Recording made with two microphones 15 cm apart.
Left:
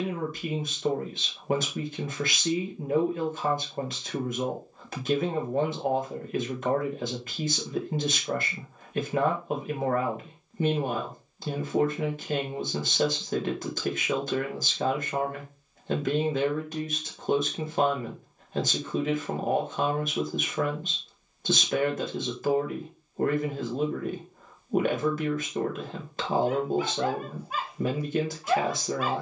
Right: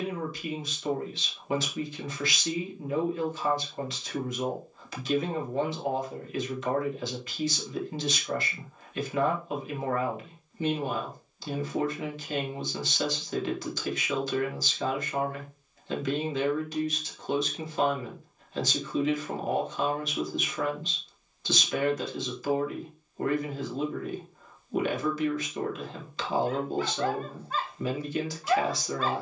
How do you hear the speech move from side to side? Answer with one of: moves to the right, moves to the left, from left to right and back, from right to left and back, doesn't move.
doesn't move.